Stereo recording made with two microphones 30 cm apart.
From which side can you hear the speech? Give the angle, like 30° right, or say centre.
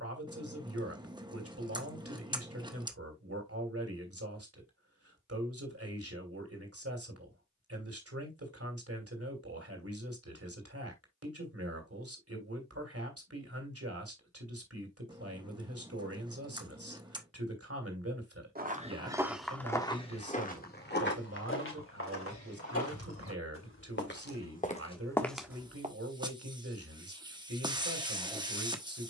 50° right.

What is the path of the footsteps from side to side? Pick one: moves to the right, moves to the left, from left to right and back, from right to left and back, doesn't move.
from right to left and back.